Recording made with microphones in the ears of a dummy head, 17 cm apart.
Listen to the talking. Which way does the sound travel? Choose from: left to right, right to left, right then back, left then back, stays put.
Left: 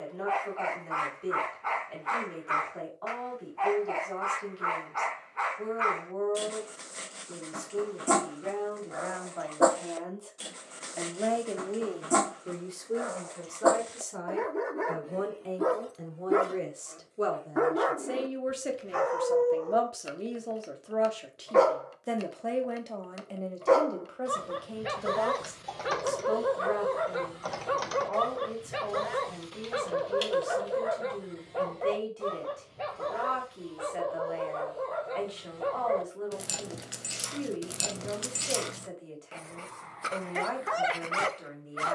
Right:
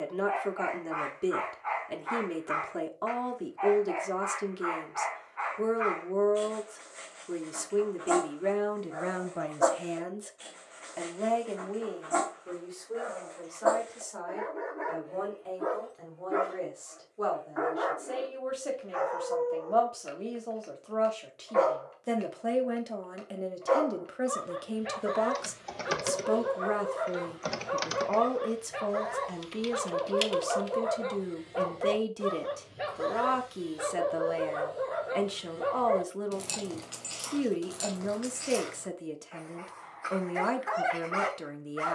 left then back.